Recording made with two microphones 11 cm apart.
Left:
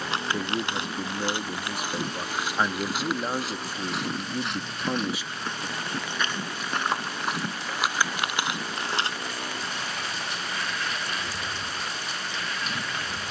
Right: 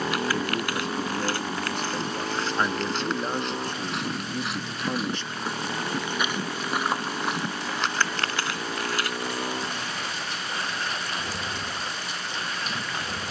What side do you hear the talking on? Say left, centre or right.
centre.